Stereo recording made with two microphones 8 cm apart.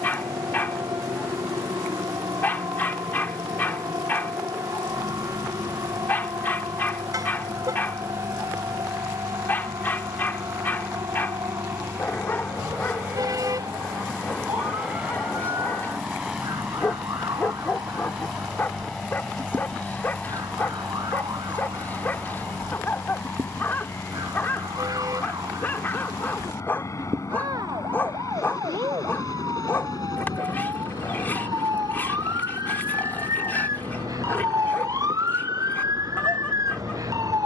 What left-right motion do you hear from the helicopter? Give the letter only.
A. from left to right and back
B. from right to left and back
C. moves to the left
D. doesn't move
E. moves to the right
C.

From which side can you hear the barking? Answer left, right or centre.
left.